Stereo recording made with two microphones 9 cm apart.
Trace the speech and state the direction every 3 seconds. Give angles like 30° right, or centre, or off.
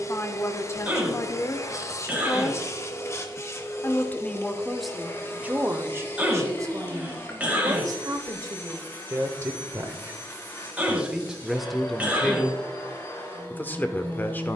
30° left, centre, 40° right, 20° right, 20° left.